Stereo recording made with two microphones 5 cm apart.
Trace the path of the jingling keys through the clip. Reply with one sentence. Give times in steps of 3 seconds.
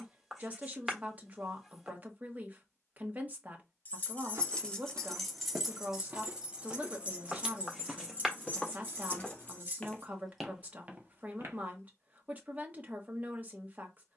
You can hear the jingling keys not at all from 0 s, in the centre from 3 s, on the right from 6 s and not at all from 12 s.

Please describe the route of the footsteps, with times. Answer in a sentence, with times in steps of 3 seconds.
In this clip you hear the footsteps not at all from 0 s, on the right from 3 s, in the centre from 6 s and not at all from 12 s.